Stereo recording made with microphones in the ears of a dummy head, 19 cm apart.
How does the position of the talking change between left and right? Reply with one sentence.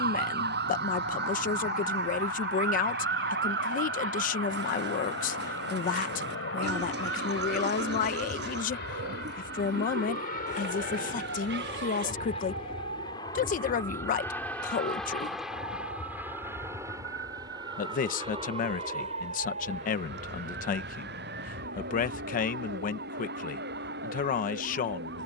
You can hear the talking stay put.